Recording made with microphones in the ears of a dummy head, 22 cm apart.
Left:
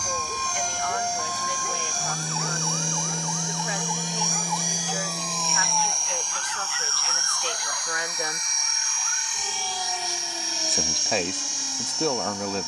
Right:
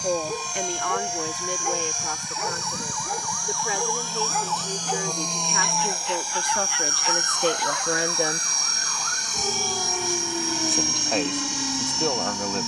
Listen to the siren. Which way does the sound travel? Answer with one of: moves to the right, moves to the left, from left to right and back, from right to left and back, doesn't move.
moves to the right.